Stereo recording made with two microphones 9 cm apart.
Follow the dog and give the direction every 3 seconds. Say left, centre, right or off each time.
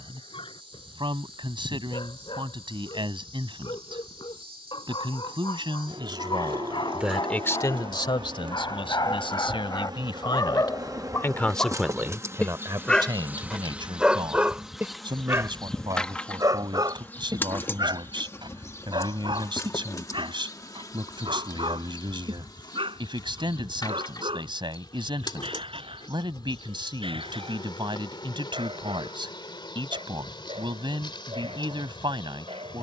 left, left, left, left, centre, right, right, right, right, right, right.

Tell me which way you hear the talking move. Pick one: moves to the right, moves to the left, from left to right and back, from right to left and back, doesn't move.
from right to left and back.